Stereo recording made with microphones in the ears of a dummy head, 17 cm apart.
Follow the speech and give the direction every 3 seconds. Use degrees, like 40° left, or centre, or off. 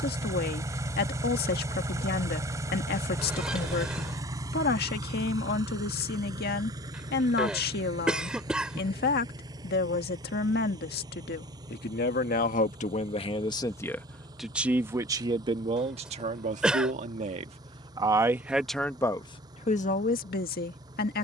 60° left, 60° left, 60° left, 60° left, 20° left, 30° right, 20° left.